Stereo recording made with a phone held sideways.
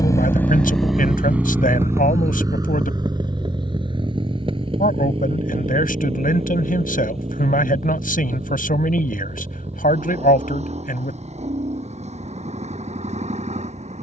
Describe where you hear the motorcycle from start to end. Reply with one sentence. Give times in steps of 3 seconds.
You can hear the motorcycle in the centre from 0 s and on the right from 3 s.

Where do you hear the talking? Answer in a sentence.
In this clip you hear the talking on the left.